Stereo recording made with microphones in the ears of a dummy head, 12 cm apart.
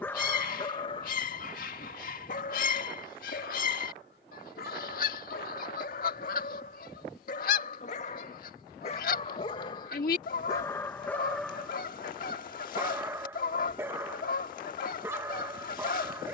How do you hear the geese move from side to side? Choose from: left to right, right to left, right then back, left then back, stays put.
stays put.